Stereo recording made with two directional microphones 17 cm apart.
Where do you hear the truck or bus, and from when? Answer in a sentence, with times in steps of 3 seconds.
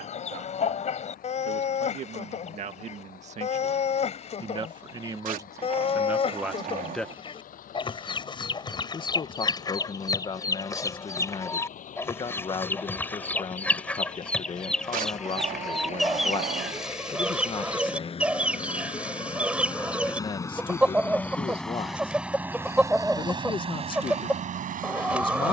You can hear the truck or bus on the left from 0 s, in the centre from 21 s and on the right from 24 s.